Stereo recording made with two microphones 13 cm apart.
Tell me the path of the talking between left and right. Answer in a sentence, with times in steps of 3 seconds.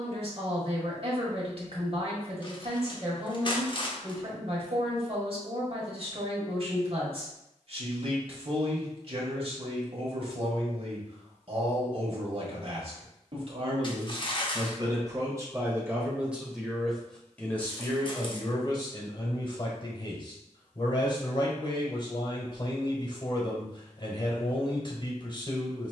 In this clip you hear the talking on the right from 0 s, in the centre from 15 s and on the left from 18 s.